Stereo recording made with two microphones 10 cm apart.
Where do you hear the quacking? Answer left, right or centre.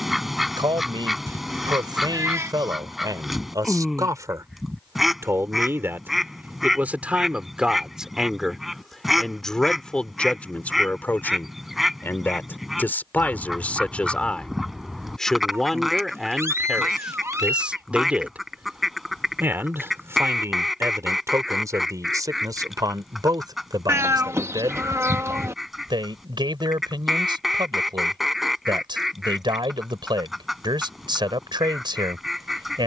centre.